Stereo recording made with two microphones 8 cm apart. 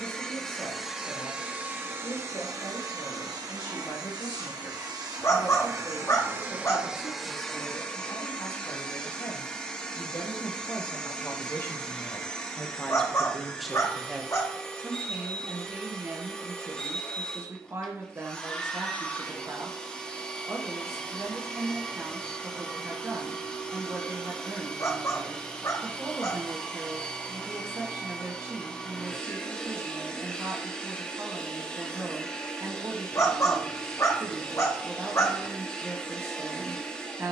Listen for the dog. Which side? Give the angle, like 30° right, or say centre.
40° left.